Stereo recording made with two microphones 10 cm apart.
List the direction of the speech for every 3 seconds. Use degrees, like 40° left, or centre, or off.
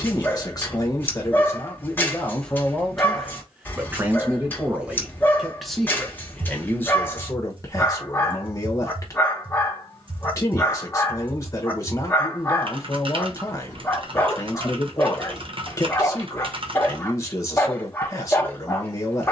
20° left, 10° right, 30° left, 30° left, 30° left, 30° left, 30° left.